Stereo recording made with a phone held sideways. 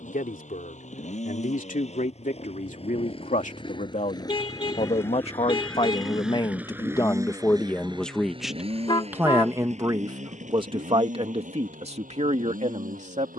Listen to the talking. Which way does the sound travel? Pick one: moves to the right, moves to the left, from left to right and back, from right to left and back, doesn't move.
moves to the right.